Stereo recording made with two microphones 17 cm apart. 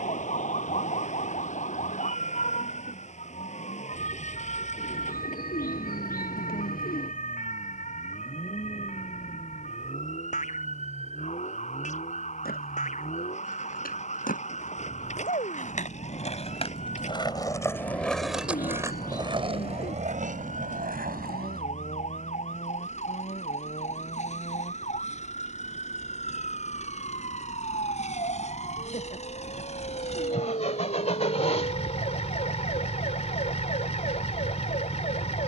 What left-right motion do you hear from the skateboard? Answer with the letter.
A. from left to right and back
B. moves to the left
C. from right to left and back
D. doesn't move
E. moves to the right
E.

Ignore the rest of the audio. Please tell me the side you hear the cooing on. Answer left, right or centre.
left.